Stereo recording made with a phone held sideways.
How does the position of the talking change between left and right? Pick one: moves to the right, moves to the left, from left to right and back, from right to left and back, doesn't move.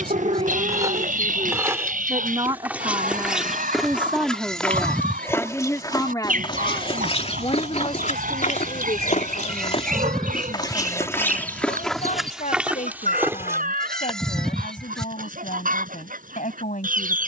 moves to the left.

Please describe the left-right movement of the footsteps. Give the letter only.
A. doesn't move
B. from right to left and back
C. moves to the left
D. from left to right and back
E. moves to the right
B.